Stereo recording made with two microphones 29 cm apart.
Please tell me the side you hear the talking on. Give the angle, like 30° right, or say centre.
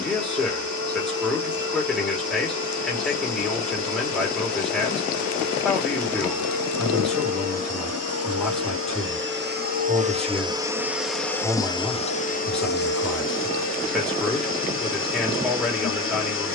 centre.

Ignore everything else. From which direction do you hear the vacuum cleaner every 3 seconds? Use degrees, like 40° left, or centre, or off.
70° right, 70° right, 60° right, 10° right, 40° left, 40° left.